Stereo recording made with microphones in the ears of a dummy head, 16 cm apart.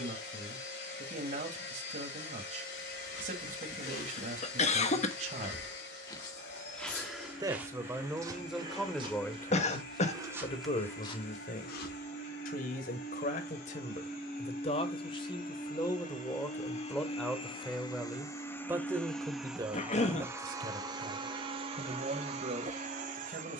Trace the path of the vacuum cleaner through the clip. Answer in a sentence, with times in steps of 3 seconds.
In this clip you hear the vacuum cleaner on the left from 0 s, in the centre from 18 s and on the right from 21 s.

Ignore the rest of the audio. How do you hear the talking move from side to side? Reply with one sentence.
You can hear the talking move from right to left and back again.